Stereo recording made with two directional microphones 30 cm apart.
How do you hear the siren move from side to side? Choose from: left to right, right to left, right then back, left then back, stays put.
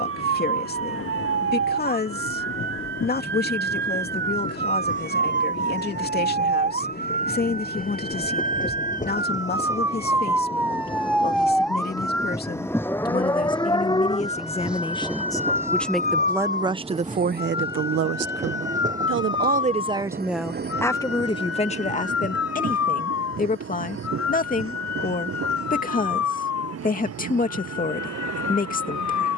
right to left.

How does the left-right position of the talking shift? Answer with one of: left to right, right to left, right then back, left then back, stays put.
right then back.